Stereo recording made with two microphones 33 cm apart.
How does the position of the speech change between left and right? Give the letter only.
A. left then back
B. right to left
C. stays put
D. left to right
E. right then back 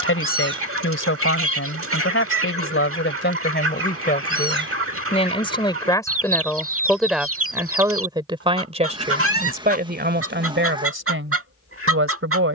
D.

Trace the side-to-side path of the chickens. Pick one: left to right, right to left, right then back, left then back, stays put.
stays put.